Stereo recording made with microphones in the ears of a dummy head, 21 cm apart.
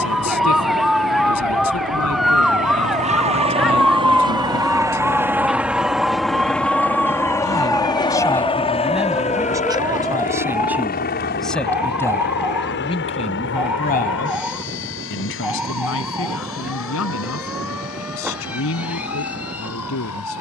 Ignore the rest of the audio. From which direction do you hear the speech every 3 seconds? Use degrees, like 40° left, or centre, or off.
70° left, 70° left, 10° left, 10° right, 30° left, 60° left, 60° left.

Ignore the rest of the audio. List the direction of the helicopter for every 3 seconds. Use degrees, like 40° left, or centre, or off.
40° right, 20° right, 10° left, 40° left, 50° left, 60° left, 60° left.